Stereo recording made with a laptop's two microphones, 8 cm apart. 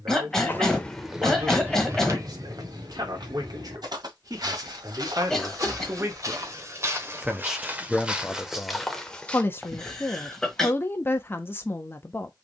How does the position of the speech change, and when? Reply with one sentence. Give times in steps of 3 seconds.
In this clip you hear the speech on the right from 0 s, in the centre from 6 s and on the left from 9 s.